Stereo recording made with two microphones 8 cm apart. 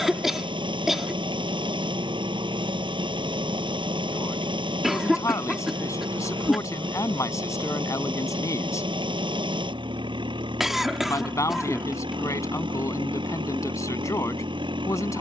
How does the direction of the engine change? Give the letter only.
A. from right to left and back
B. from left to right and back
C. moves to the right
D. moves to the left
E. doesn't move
E.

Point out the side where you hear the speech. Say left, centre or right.
left.